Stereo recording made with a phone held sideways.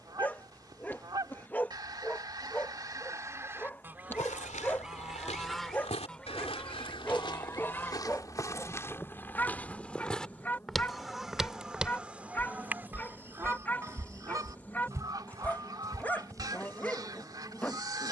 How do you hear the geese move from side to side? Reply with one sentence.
In this clip you hear the geese move from right to left and back again.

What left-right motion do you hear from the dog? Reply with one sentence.
In this clip you hear the dog stay in one place.